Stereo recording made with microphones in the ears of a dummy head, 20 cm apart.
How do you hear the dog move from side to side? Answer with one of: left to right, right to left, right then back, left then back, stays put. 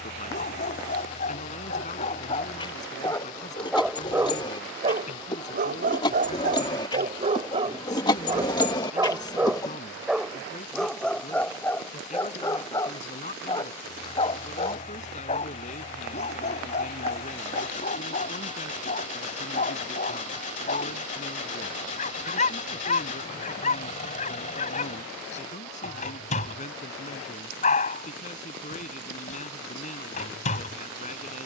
right then back.